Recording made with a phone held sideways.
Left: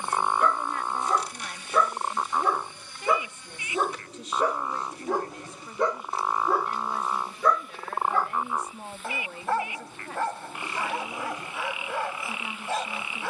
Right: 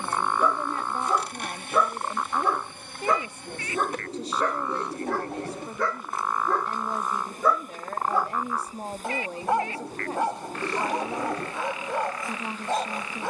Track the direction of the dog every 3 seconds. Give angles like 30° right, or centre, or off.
10° right, 10° left, centre, 20° right, 20° right.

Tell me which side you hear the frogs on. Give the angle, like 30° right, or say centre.
20° left.